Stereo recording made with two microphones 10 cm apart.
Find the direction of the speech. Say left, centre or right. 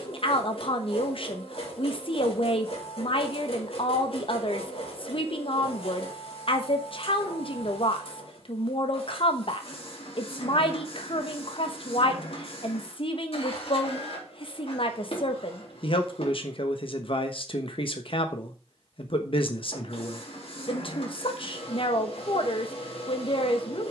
left.